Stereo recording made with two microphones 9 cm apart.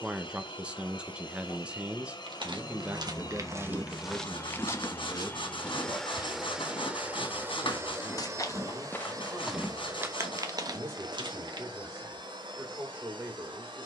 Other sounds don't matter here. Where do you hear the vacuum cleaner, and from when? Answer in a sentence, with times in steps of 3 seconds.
In this clip you hear the vacuum cleaner on the left from 0 s and on the right from 6 s.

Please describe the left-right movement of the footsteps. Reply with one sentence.
You can hear the footsteps go left and come back.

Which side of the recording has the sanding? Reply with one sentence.
You can hear the sanding on the left.